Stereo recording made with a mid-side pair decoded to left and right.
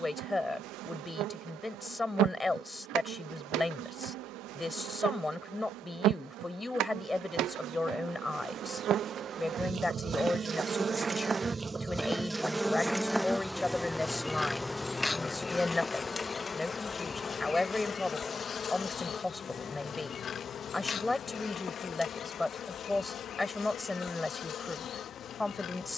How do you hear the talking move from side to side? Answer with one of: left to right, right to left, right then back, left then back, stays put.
stays put.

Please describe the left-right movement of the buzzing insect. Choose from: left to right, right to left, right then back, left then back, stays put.
right to left.